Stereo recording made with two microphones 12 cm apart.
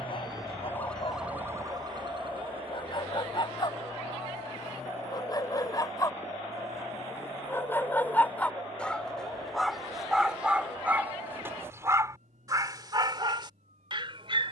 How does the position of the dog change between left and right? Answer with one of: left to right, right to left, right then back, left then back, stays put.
left to right.